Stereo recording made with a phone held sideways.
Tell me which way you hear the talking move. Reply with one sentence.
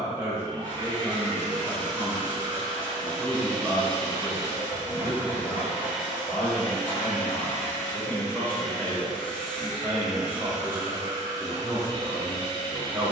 In this clip you hear the talking go left and come back.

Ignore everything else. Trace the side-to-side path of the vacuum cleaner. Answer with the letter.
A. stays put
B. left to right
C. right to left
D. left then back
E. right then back
D.